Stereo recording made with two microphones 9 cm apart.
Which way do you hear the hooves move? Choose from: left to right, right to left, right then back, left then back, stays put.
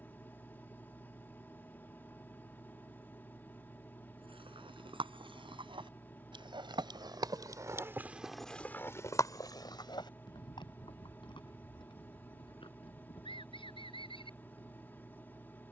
right to left.